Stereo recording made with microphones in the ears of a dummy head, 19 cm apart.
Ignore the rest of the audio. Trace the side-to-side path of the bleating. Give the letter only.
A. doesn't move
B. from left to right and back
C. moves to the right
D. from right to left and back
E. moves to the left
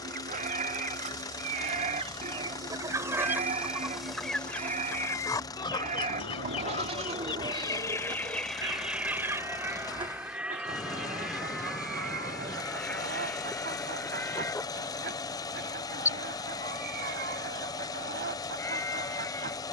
E.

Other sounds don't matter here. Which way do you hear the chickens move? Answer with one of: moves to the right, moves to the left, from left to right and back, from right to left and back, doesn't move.
from right to left and back.